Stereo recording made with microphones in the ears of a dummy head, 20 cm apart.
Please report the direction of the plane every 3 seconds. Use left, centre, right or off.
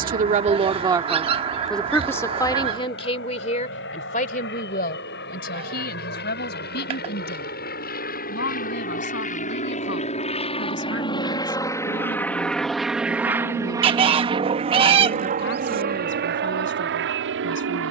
left, left, left, left, centre, right.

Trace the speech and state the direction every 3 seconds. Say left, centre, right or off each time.
centre, left, left, left, left, left.